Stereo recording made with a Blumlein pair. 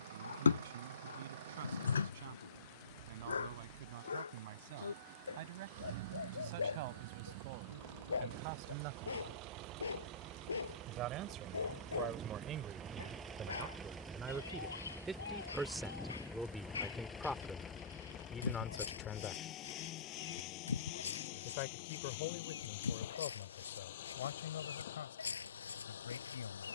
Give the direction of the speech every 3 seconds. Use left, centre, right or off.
right, right, right, right, right, centre, left, left, left.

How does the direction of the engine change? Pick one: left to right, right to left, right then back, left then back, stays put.
right to left.